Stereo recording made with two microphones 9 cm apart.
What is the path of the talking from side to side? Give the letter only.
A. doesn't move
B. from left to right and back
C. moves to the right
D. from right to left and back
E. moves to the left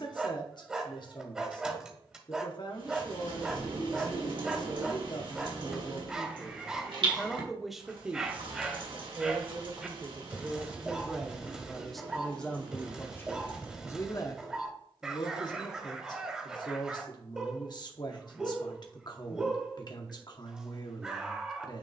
B.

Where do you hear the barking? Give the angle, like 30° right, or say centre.
10° right.